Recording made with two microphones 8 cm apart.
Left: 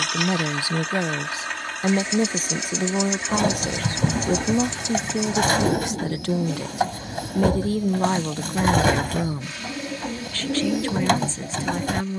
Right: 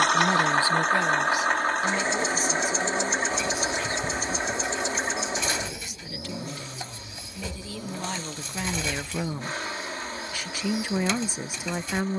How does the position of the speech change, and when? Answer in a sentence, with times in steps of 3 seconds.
You can hear the speech on the left from 0 s and in the centre from 9 s.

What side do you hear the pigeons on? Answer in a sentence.
In this clip you hear the pigeons on the left.